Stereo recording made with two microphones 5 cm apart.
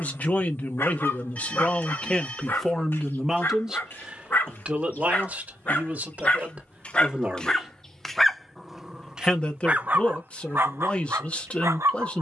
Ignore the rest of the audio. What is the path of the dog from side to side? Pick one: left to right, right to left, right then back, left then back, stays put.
left to right.